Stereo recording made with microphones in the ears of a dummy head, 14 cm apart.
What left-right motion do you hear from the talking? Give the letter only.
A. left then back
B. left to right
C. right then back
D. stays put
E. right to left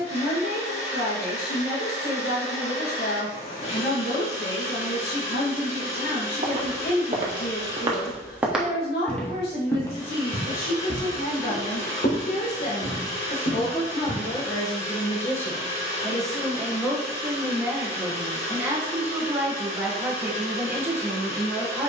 B.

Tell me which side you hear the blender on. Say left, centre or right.
left.